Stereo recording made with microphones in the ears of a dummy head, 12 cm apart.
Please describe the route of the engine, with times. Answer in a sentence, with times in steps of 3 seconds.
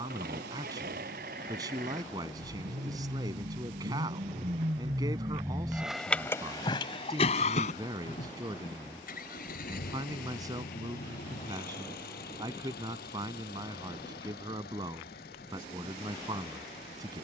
In this clip you hear the engine on the right from 0 s and on the left from 6 s.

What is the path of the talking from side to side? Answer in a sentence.
In this clip you hear the talking stay in one place.